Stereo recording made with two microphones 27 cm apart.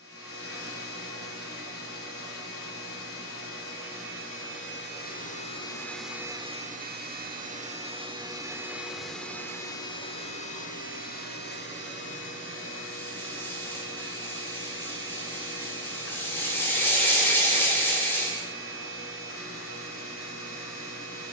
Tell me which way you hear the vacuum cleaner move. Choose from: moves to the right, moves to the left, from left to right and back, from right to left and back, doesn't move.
from left to right and back.